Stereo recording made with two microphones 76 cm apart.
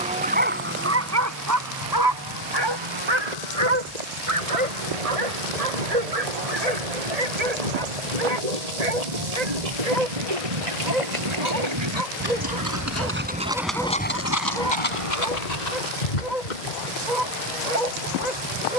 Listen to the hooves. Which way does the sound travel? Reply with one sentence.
In this clip you hear the hooves move from right to left.